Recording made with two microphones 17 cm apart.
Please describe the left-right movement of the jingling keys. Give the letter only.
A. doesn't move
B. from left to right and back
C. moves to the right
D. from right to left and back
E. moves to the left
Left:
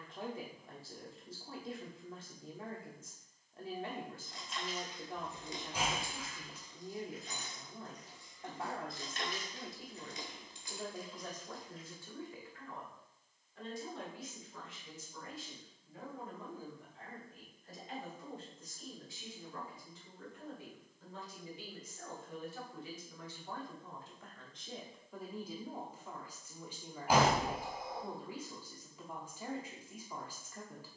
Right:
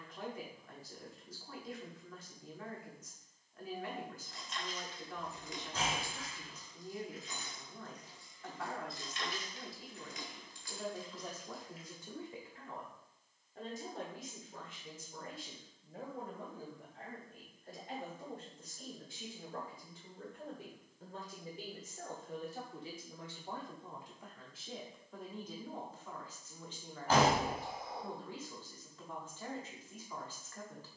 D.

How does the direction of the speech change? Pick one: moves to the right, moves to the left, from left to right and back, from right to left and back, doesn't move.
from left to right and back.